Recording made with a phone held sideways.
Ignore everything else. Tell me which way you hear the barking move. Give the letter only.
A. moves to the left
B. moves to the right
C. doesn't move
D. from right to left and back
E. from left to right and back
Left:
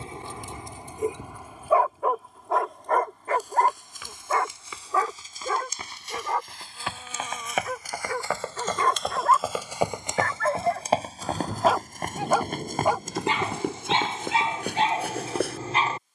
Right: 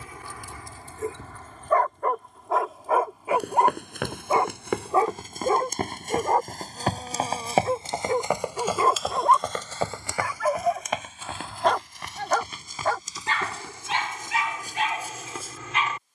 E.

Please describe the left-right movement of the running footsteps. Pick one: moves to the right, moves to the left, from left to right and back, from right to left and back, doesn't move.
moves to the left.